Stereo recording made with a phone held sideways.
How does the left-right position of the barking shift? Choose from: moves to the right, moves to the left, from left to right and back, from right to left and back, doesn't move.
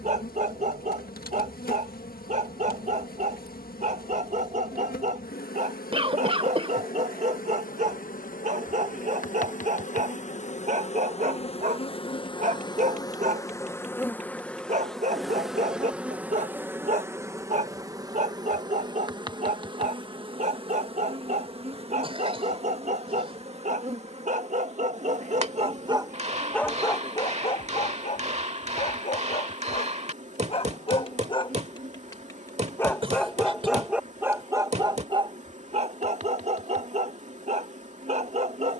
from right to left and back.